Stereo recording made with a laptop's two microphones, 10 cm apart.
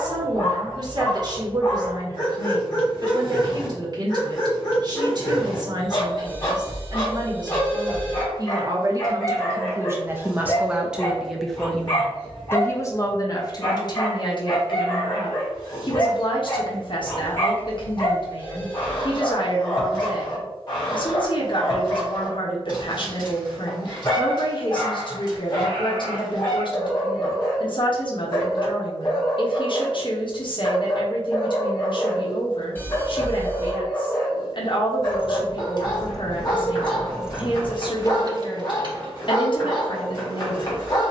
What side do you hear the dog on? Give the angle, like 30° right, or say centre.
50° left.